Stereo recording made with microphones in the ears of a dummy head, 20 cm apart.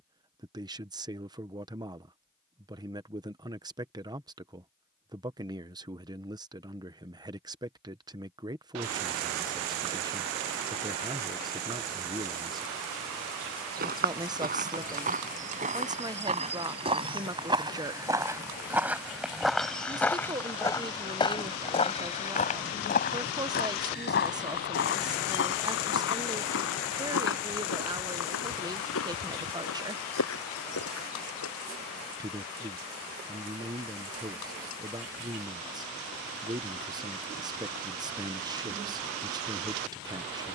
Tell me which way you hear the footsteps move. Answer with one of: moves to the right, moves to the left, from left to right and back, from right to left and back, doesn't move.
moves to the left.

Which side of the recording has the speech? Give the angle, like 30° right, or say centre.
20° right.